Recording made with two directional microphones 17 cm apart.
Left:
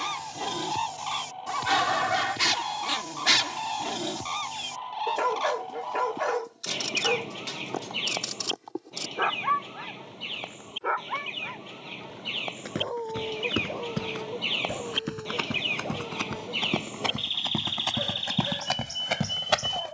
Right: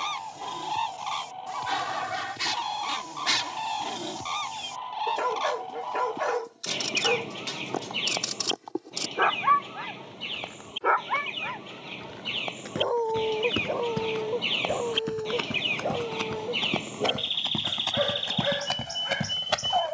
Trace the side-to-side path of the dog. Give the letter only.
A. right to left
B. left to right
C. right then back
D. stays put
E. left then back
B.